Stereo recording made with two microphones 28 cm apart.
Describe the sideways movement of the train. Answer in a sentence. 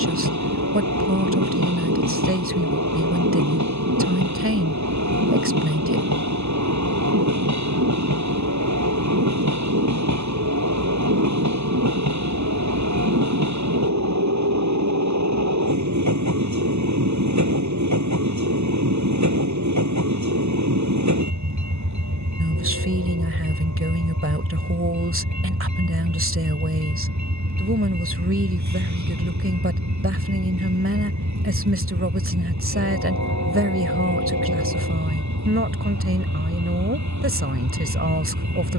You can hear the train stay put.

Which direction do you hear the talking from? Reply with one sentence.
You can hear the talking on the right.